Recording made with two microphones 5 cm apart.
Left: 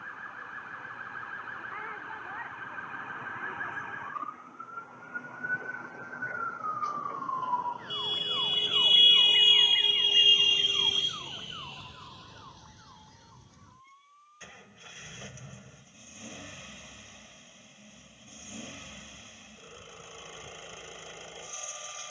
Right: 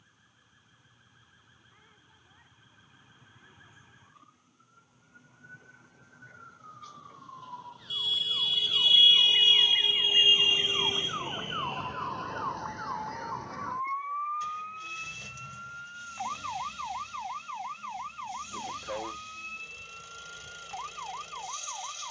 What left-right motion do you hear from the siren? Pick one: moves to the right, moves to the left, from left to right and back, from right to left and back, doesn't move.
moves to the right.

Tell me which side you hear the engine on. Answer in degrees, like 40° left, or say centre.
30° left.